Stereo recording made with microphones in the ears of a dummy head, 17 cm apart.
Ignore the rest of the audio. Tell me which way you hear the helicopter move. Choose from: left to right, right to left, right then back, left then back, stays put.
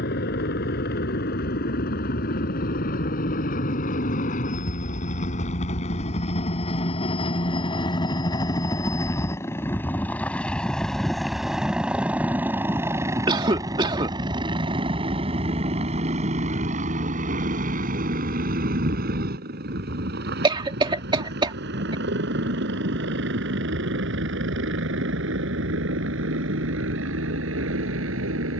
left to right.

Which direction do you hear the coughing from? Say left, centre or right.
right.